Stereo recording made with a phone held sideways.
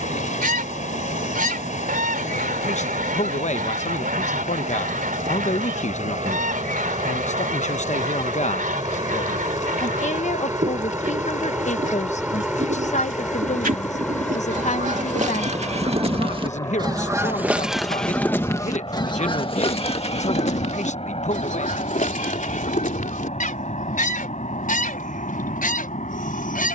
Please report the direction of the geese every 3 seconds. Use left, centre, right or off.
right, right, right, right, right, right, left, left, left.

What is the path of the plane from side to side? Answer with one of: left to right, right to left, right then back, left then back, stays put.
right to left.